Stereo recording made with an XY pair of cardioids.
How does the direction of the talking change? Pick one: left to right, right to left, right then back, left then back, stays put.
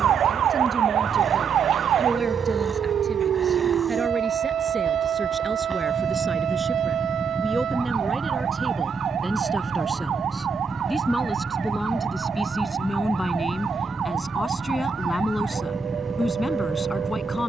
right to left.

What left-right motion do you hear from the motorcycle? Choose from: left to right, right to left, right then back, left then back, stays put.
stays put.